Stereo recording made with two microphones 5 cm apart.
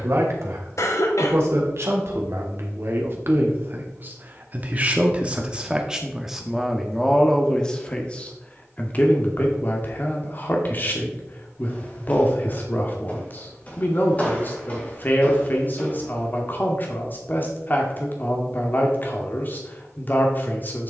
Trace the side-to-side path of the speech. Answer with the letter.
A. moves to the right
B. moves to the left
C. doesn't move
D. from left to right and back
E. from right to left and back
B.